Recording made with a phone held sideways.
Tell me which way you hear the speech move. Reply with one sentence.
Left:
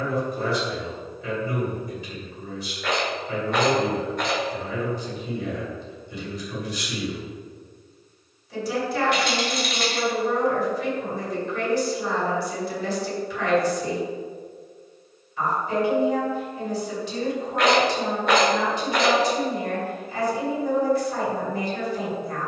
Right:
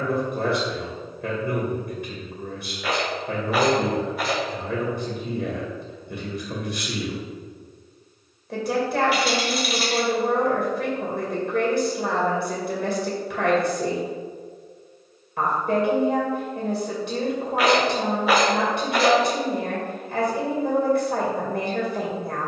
You can hear the speech stay put.